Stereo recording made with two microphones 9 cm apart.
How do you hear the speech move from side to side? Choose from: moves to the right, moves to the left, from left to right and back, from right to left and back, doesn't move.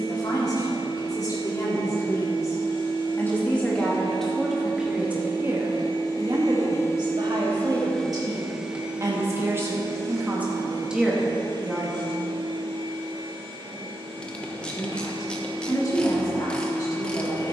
from left to right and back.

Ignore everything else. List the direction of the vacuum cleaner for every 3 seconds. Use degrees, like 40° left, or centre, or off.
50° left, 50° left, 20° left, 40° right, 60° right, 60° right.